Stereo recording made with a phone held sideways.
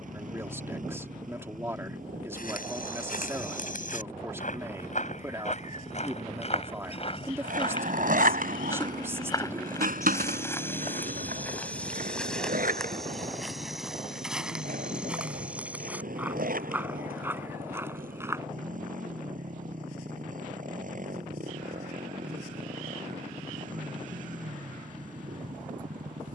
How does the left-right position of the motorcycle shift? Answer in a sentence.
You can hear the motorcycle stay put.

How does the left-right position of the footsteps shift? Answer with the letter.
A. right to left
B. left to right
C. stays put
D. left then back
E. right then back
B.